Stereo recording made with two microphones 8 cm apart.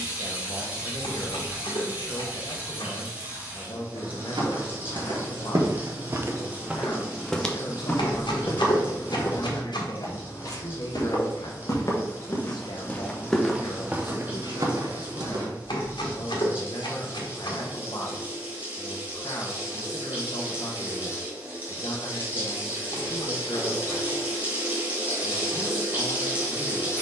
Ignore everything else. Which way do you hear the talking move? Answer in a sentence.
You can hear the talking stay put.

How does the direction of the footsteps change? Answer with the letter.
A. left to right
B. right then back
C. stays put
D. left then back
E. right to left
D.